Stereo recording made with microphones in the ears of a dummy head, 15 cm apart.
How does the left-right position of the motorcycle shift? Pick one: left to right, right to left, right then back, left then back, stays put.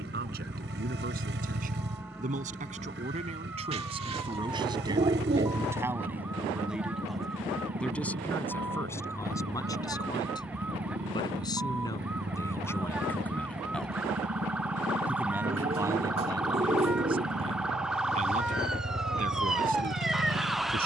stays put.